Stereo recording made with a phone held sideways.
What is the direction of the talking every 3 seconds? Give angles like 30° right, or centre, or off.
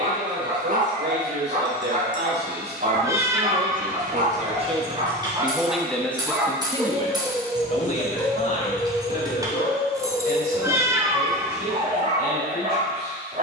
80° right, 40° right, 30° left, 60° left, 60° left.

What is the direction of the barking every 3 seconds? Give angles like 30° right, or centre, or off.
50° right, 40° right, 10° left, 20° left, 50° right.